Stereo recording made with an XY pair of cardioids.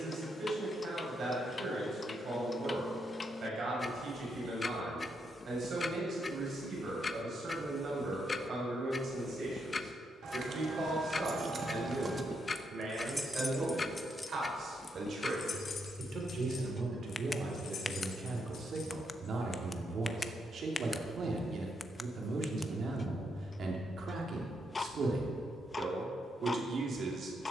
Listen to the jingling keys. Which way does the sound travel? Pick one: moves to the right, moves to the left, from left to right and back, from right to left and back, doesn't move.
moves to the left.